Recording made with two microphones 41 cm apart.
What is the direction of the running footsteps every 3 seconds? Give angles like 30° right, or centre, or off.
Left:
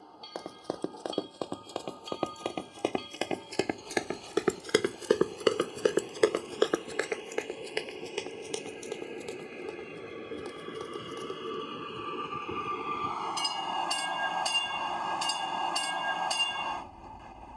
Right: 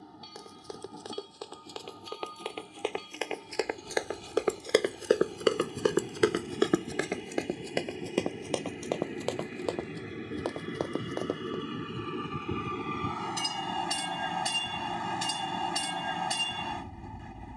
60° left, 30° left, 50° right, 80° right, off, off.